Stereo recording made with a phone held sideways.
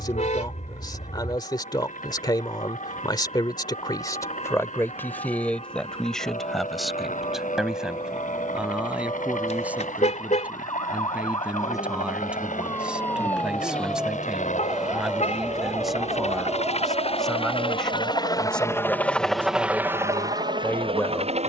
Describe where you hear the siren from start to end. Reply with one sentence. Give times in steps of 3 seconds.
In this clip you hear the siren on the left from 0 s, in the centre from 12 s and on the right from 15 s.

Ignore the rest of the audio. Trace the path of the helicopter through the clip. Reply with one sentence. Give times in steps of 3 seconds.
You can hear the helicopter on the left from 0 s and in the centre from 18 s.